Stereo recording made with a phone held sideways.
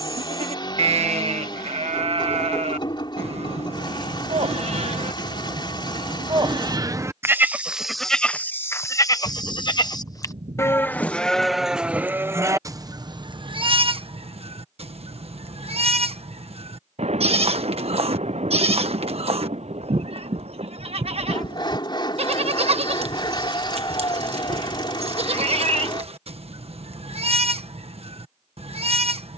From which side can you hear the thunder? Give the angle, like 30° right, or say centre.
60° right.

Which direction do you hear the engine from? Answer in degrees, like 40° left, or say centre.
40° left.